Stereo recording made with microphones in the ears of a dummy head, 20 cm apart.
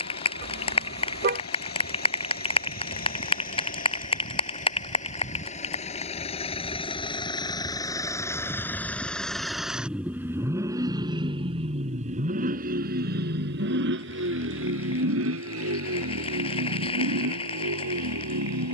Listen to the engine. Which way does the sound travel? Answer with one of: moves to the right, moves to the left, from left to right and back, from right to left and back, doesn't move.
moves to the right.